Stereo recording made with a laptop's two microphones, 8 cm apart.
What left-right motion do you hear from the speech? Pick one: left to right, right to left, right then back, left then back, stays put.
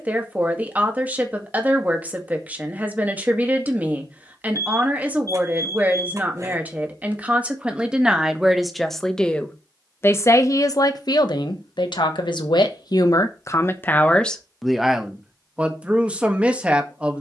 left then back.